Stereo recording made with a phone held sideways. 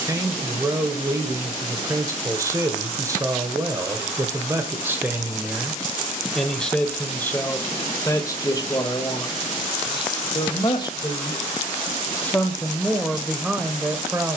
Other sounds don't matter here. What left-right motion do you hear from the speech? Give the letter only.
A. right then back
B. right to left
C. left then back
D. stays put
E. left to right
C.